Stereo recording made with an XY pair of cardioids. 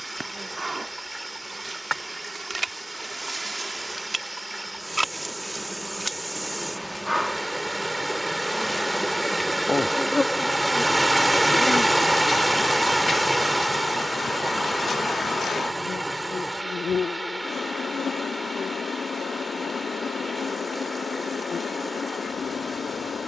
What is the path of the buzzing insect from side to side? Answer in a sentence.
In this clip you hear the buzzing insect move from right to left.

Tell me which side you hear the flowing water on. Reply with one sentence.
In this clip you hear the flowing water in the centre.